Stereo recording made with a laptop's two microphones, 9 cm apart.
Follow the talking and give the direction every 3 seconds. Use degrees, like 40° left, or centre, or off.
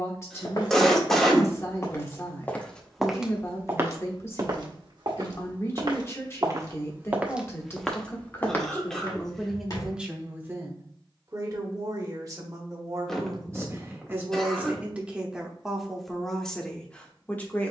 30° left, 30° left, 30° left, 20° right, 30° right, centre.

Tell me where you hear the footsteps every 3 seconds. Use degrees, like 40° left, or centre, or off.
30° left, 40° right, 10° right, 40° left, off, off.